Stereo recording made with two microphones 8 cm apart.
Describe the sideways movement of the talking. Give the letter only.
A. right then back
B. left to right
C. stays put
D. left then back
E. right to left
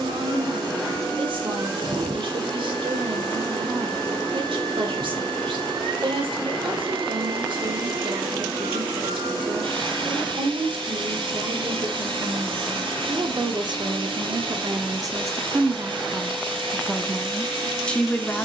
E.